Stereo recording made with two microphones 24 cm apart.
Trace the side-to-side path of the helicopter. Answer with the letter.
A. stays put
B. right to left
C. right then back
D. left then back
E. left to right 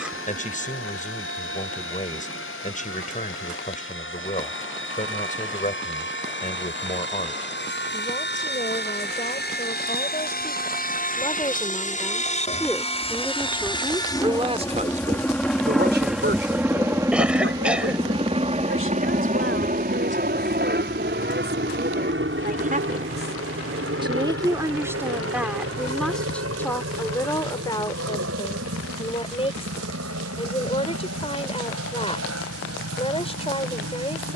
E.